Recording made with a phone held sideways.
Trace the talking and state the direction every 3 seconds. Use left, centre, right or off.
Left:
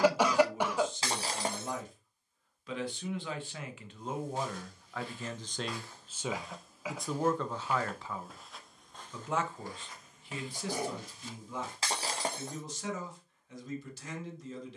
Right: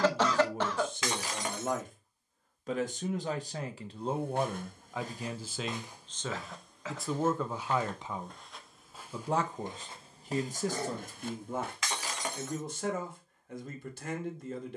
right, right, centre, right, right.